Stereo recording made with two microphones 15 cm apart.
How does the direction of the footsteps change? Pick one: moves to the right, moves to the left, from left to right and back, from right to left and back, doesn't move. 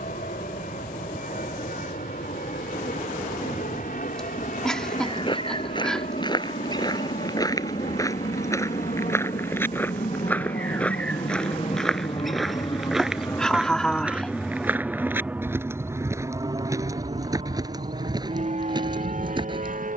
moves to the right.